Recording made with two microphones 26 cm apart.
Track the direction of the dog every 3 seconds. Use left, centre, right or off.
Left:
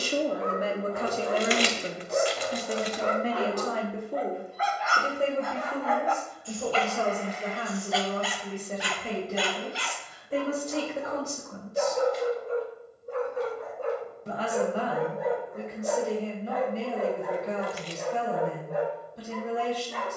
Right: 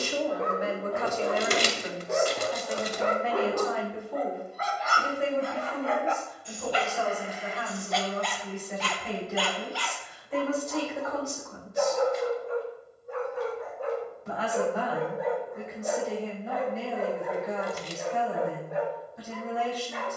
right, right, centre, left, left, left, left.